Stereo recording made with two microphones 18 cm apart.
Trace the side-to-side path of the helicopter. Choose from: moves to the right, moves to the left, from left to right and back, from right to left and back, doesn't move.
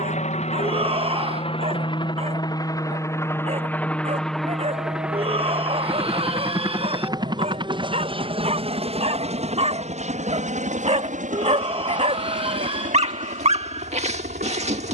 moves to the right.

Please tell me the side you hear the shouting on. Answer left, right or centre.
right.